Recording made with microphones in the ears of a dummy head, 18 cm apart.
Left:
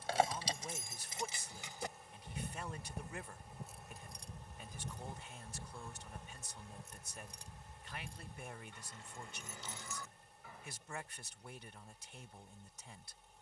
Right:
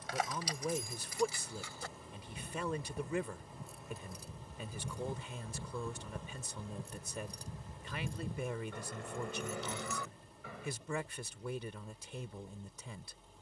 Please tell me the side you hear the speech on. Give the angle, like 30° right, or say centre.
60° right.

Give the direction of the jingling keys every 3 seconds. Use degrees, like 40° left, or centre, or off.
20° left, 10° right, 30° right, 50° right, off.